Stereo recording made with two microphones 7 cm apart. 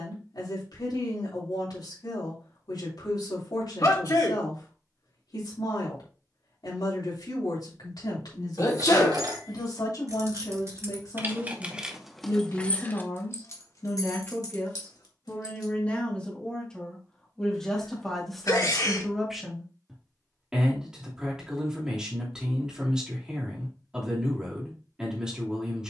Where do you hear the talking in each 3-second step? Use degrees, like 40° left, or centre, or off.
70° left, 70° left, 70° left, 50° left, 40° left, 10° left, centre, 10° right, 10° right.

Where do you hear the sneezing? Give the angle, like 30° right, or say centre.
60° left.